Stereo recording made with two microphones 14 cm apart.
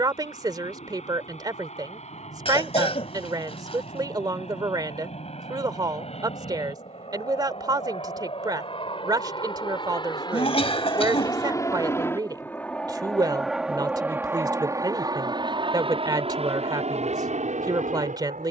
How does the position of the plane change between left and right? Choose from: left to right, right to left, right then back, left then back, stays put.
left to right.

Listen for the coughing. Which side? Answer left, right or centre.
left.